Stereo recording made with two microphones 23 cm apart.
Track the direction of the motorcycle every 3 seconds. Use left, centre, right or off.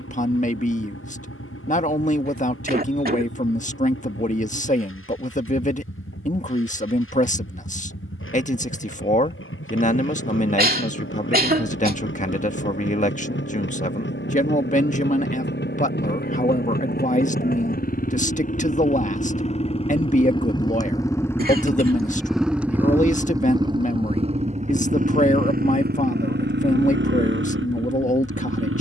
left, left, left, left, left, left, left, centre, right, right.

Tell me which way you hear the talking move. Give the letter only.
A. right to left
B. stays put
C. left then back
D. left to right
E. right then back
B.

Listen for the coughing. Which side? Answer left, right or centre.
right.